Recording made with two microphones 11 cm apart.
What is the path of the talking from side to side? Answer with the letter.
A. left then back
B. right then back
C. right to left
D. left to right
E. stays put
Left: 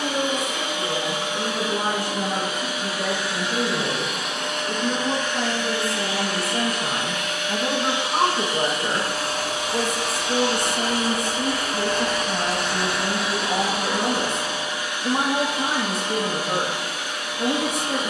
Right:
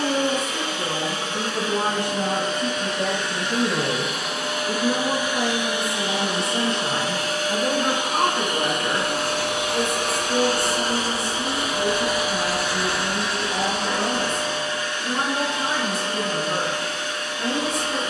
C.